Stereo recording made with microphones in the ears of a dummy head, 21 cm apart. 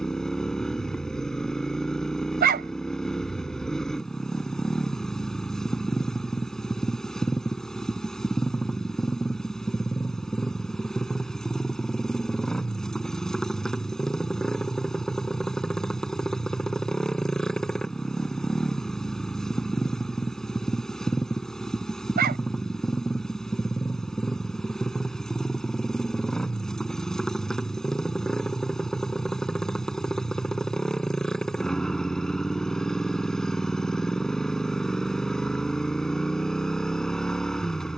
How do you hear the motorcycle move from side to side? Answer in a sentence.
In this clip you hear the motorcycle stay put.